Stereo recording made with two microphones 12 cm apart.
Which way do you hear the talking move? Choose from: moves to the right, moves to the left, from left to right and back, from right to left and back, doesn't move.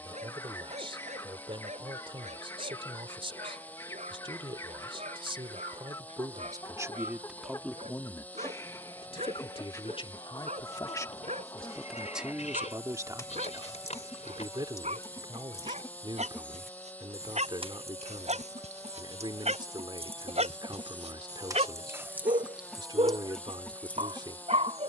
from right to left and back.